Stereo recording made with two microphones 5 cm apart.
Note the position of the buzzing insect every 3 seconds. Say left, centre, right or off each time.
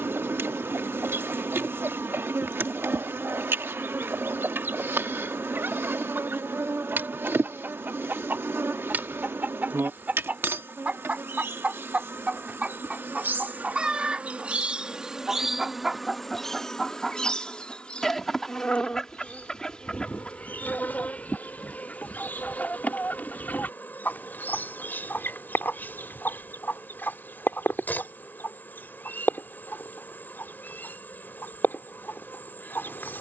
right, right, right, right, right, centre, left, left, left, left, left.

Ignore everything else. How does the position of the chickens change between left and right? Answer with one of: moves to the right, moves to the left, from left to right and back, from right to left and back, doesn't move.
moves to the left.